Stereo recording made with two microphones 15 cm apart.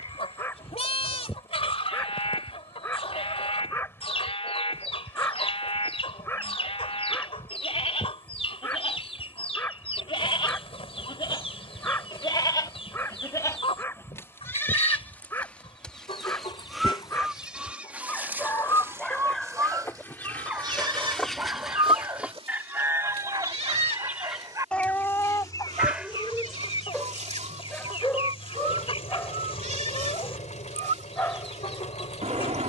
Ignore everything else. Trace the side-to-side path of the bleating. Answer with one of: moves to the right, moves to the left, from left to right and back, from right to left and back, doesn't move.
moves to the right.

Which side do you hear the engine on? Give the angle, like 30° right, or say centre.
50° left.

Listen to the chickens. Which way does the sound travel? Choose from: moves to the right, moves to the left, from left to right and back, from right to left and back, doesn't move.
from left to right and back.